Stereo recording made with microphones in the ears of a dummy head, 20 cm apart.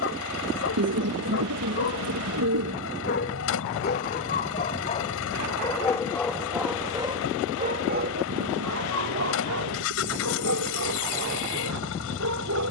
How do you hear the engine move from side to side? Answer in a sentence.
In this clip you hear the engine stay put.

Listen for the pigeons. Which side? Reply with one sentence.
In this clip you hear the pigeons on the right.